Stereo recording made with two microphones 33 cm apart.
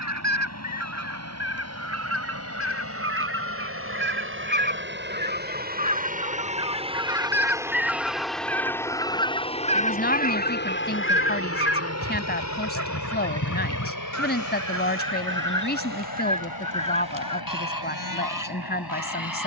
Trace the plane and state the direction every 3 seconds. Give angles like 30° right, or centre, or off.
50° right, 40° right, 10° right, 30° left, 50° left, 70° left, 70° left.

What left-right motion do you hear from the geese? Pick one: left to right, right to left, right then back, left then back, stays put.
right to left.